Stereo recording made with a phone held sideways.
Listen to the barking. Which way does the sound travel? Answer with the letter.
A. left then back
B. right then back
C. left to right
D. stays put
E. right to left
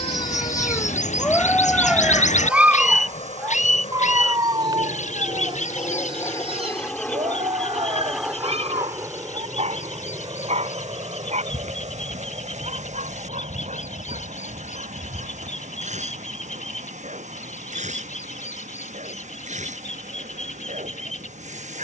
C.